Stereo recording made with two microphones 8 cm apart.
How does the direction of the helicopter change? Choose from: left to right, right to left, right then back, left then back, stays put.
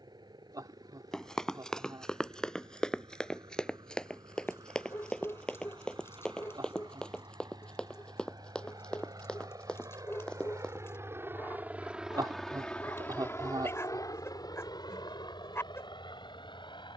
right to left.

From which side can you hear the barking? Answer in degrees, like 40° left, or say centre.
30° left.